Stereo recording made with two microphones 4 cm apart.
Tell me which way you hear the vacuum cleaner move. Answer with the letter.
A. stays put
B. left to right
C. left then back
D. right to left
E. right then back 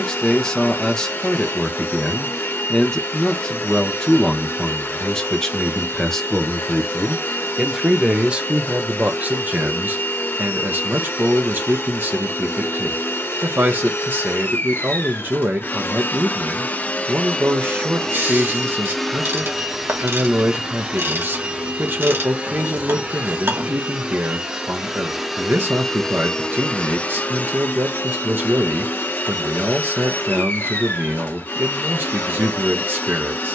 E.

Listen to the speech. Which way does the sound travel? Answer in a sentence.
You can hear the speech travel towards the right.